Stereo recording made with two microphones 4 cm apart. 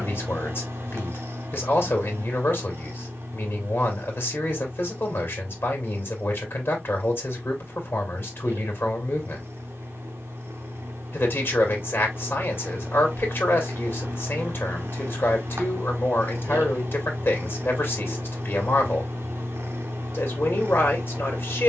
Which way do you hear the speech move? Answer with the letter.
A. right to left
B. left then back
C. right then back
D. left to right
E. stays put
E.